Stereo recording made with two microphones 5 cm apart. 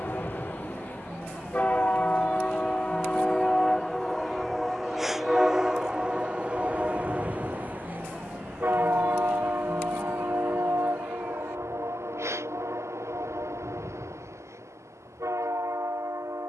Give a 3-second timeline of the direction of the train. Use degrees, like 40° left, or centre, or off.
30° left, centre, 30° right, 60° right, 70° right, 70° right.